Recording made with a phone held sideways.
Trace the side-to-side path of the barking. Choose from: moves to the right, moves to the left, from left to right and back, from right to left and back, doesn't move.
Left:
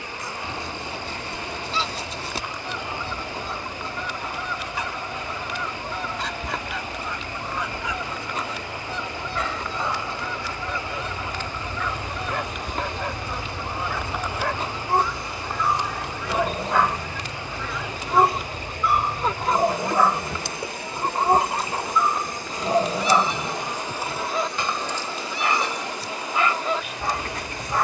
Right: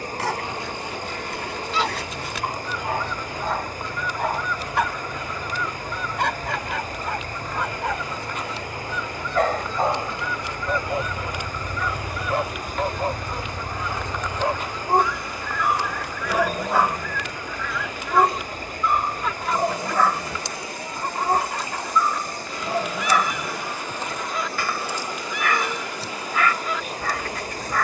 moves to the left.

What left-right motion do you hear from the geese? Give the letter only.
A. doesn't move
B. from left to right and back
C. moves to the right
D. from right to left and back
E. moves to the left
A.